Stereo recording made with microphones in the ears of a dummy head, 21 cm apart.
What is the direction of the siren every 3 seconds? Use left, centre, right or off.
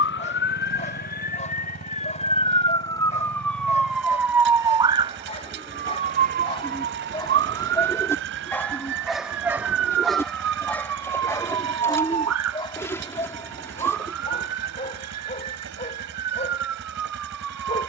left, centre, right, right, right, right.